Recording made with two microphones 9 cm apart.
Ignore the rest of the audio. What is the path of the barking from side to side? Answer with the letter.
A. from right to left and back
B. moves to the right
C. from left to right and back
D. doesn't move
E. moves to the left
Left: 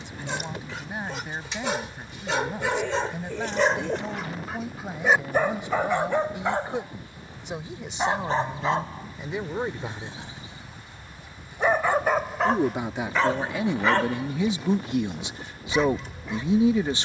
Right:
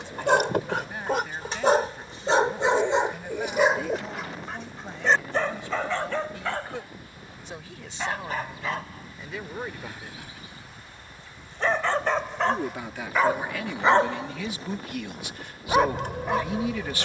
A.